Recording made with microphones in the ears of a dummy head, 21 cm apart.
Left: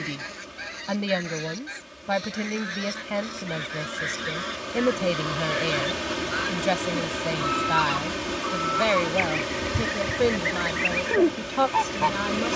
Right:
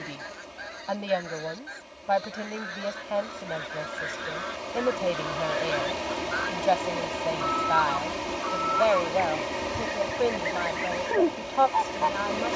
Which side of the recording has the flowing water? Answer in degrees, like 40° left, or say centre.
20° left.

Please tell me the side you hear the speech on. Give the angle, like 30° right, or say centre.
30° left.